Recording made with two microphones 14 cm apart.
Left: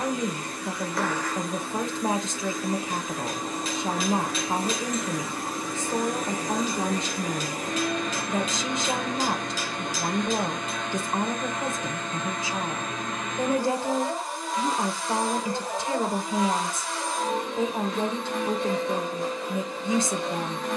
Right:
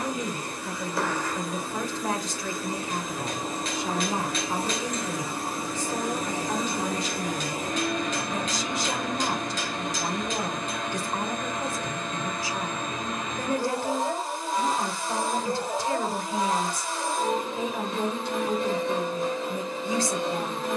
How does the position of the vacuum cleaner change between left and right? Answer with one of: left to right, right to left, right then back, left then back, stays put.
stays put.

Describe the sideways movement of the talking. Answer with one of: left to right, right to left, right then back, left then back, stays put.
stays put.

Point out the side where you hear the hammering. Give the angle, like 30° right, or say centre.
centre.